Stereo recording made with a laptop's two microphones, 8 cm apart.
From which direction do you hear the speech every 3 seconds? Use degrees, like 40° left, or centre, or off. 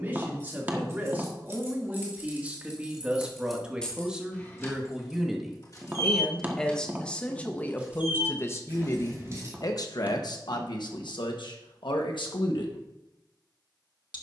20° right, 10° right, 20° left, 60° left, 70° left.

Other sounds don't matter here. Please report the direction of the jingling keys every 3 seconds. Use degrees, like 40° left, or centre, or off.
20° right, 20° left, centre, 40° right, off.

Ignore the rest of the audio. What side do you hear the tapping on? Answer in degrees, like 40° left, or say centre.
20° right.